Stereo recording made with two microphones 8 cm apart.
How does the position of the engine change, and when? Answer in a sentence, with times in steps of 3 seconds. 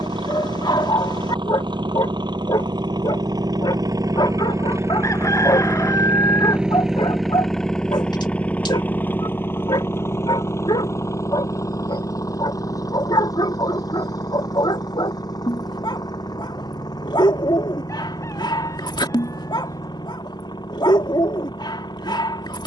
In this clip you hear the engine on the right from 0 s, in the centre from 6 s and on the left from 9 s.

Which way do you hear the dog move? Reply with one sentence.
You can hear the dog stay in one place.